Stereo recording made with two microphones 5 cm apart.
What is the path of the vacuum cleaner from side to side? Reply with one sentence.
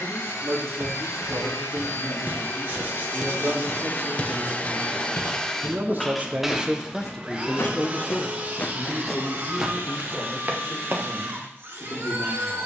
You can hear the vacuum cleaner go from the left side to the right.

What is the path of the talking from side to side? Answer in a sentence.
In this clip you hear the talking travel towards the left.